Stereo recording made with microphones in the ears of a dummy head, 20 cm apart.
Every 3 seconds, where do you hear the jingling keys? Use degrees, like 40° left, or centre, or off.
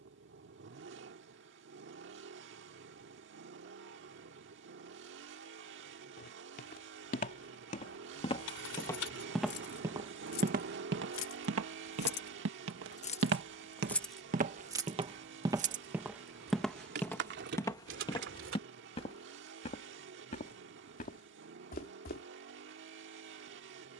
off, off, 80° left, 70° left, 20° left, 50° right, 60° right, off.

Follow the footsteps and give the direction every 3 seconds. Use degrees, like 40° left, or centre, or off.
off, off, 30° left, 40° right, 50° right, centre, 30° left, 40° left.